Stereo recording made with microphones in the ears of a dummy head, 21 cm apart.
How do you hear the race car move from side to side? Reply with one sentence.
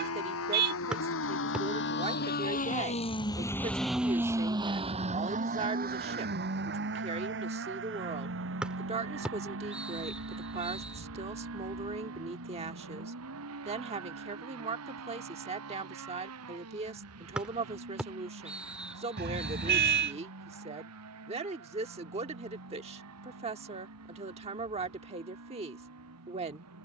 You can hear the race car move from left to right.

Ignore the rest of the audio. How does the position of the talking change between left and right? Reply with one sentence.
In this clip you hear the talking stay put.